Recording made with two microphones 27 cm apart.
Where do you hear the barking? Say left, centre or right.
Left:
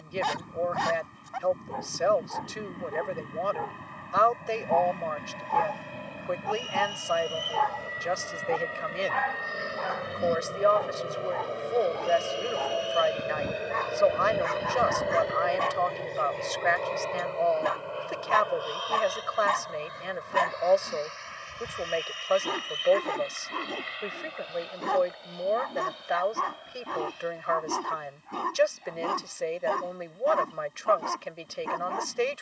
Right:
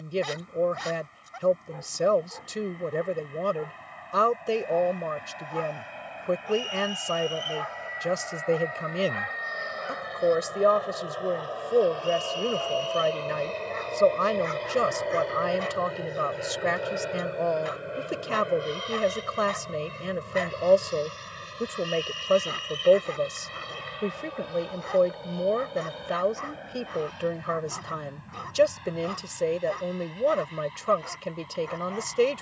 left.